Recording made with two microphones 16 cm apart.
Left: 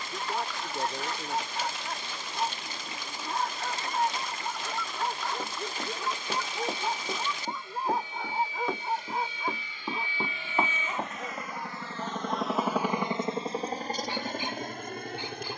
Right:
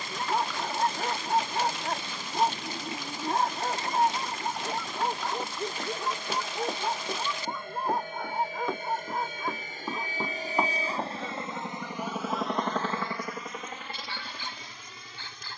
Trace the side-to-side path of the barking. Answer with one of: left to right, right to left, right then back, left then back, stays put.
right to left.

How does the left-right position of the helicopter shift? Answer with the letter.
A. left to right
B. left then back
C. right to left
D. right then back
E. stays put
C.